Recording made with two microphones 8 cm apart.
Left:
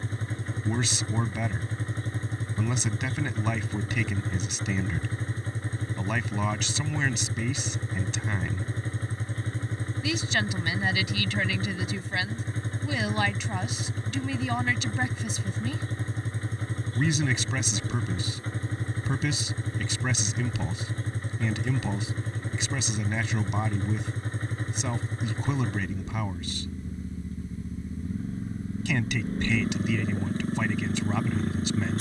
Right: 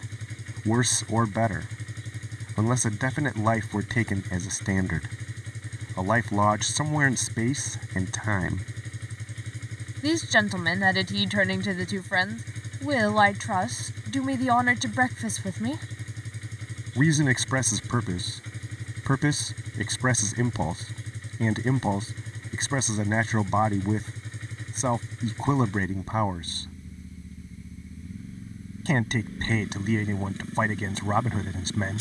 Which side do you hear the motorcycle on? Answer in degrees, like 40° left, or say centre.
40° left.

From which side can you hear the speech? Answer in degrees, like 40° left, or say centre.
40° right.